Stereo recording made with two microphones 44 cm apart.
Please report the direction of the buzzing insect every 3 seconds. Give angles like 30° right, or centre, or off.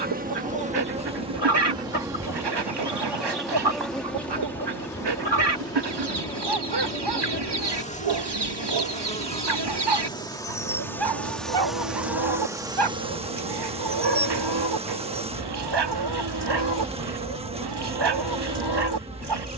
10° right, centre, 10° left, 10° left, 10° right, 10° right, 10° right.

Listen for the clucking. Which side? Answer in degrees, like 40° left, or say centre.
70° right.